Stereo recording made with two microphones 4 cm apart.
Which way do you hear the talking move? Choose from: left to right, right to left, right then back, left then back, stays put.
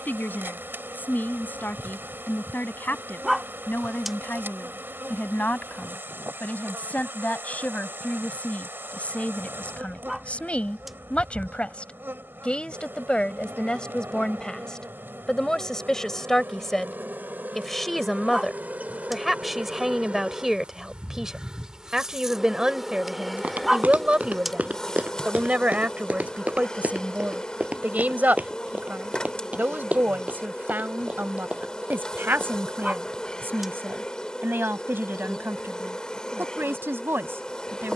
left to right.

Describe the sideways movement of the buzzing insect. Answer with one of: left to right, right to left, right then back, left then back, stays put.
right to left.